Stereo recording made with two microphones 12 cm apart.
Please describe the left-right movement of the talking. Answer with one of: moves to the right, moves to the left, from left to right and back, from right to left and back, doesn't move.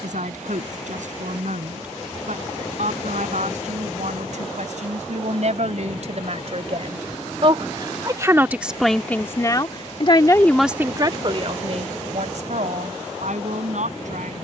from right to left and back.